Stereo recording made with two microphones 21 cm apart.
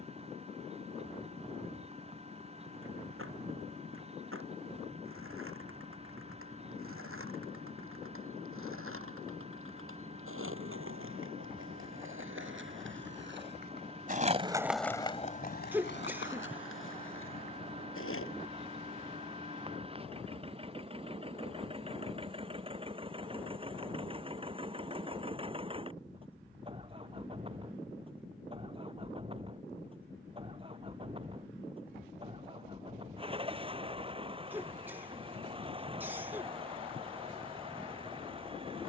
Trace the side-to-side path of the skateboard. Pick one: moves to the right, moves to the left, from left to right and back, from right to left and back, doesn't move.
moves to the left.